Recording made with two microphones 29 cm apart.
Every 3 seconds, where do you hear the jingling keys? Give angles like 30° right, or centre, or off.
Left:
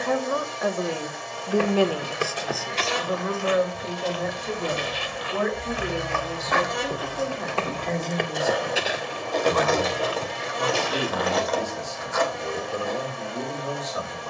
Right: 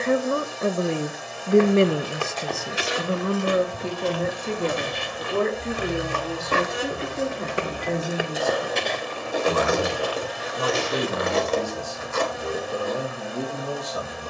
off, 30° left, 10° left, 20° right, 40° right.